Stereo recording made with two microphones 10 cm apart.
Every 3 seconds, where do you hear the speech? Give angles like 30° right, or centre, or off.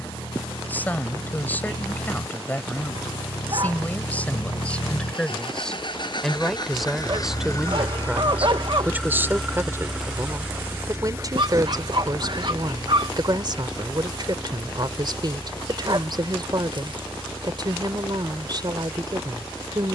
20° left, 10° left, 10° right, 30° right, 50° right, 50° right, 50° right.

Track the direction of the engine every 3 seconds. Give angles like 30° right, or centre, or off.
80° left, 60° left, 30° left, 20° right, 50° right, 60° right, 60° right.